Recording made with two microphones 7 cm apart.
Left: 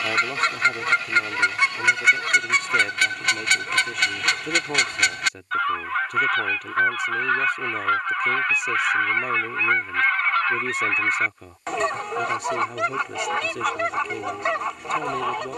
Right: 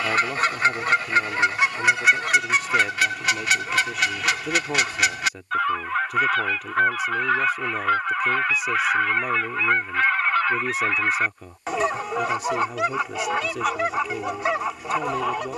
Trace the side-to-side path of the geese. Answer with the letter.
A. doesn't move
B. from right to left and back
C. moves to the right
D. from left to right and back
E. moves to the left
A.